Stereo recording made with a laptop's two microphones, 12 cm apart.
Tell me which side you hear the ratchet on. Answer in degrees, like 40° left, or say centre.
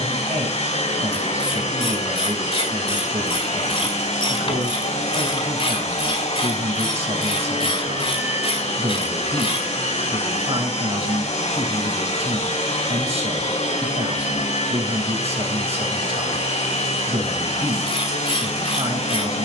50° left.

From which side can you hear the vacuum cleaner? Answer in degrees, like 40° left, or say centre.
70° left.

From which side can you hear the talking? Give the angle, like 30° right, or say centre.
60° right.